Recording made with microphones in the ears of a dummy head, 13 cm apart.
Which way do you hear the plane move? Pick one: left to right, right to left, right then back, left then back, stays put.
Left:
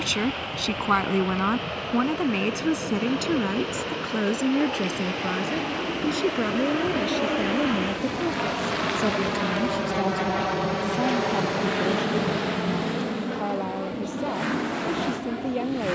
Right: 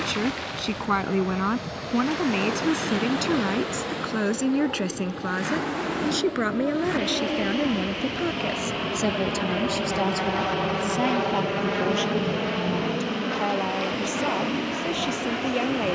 left to right.